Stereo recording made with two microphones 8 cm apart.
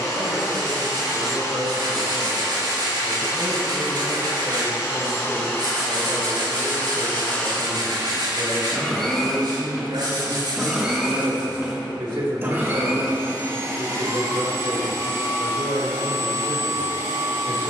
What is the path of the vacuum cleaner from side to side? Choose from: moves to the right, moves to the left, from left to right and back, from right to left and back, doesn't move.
moves to the right.